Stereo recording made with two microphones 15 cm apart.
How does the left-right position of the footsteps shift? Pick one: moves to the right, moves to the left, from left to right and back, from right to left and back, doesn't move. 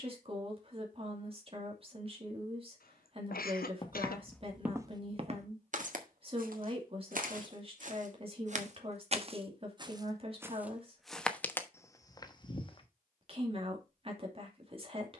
from left to right and back.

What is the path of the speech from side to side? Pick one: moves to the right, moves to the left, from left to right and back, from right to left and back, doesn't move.
doesn't move.